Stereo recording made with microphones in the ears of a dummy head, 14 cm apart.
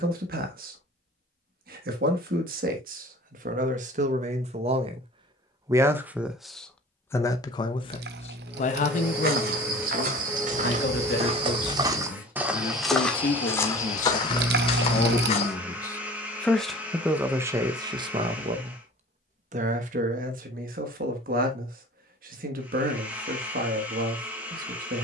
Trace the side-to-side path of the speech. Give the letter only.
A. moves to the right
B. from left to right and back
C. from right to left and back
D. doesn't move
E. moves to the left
C.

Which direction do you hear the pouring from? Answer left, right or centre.
right.